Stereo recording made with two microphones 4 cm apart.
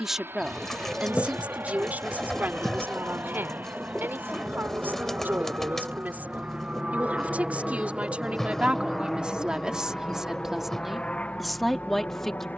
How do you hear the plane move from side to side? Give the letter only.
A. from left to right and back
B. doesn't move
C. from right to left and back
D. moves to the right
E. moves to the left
E.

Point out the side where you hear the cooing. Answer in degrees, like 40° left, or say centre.
10° left.